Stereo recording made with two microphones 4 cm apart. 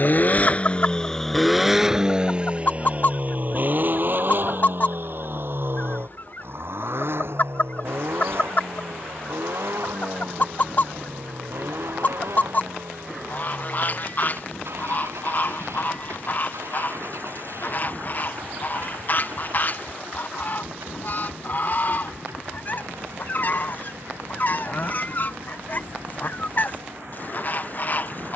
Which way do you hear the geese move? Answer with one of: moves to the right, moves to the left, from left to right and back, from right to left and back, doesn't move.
doesn't move.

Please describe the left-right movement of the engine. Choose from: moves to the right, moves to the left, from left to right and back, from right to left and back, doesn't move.
moves to the right.